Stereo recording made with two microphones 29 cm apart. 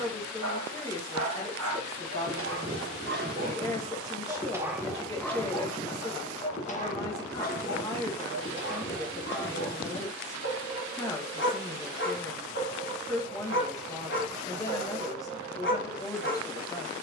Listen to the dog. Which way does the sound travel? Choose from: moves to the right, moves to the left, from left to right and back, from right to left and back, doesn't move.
moves to the left.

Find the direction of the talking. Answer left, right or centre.
centre.